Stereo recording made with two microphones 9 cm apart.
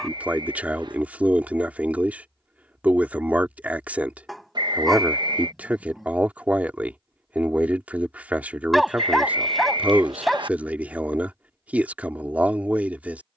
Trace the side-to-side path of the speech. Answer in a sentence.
You can hear the speech stay in one place.